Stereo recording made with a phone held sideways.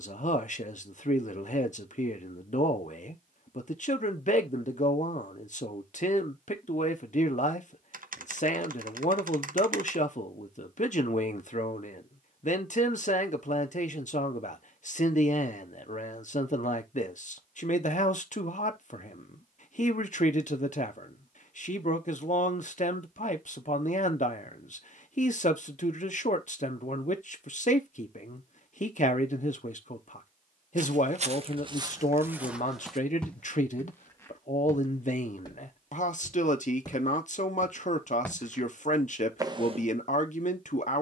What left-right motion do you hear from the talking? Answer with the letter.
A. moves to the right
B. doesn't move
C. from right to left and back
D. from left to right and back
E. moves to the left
B.